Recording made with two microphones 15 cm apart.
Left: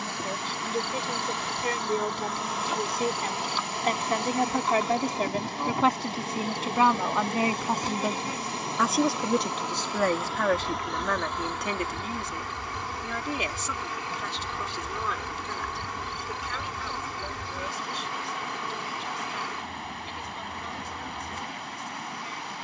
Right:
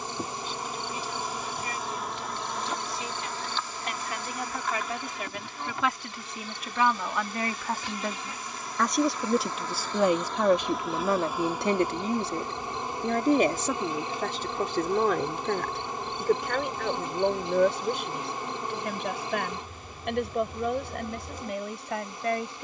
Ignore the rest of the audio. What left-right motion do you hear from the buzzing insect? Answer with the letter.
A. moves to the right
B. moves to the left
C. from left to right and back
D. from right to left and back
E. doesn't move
D.